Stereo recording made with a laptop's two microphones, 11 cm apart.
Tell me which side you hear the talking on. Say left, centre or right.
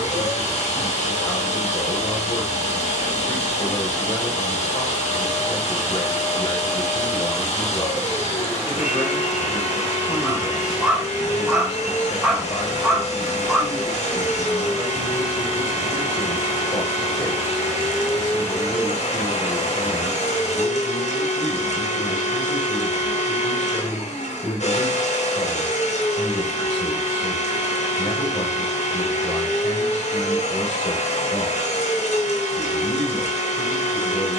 left.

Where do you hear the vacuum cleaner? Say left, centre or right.
left.